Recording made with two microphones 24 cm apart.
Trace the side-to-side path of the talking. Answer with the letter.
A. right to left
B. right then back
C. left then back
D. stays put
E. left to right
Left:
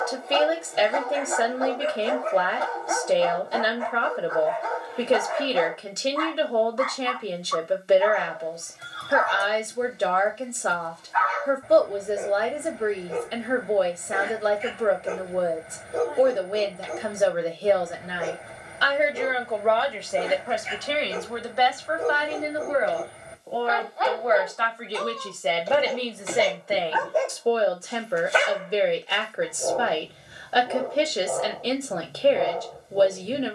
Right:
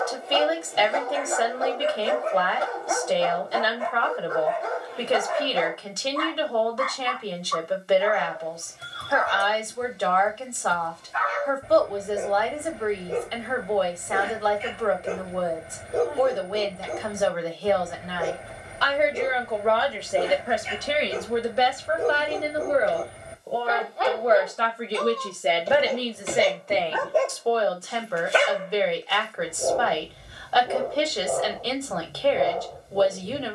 B.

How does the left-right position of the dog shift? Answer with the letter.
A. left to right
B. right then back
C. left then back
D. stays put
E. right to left
D.